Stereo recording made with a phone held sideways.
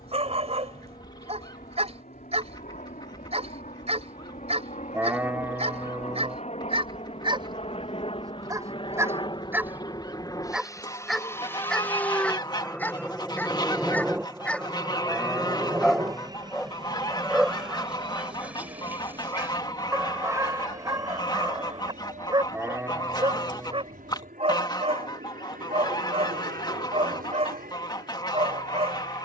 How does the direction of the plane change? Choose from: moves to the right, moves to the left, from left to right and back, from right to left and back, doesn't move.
moves to the right.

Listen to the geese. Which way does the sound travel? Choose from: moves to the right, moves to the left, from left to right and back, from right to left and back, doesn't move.
doesn't move.